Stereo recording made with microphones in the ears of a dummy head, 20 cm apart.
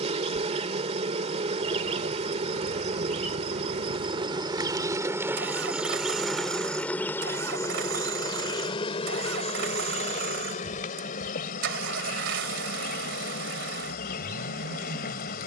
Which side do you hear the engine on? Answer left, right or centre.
right.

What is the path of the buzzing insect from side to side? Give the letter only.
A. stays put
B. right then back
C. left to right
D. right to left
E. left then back
D.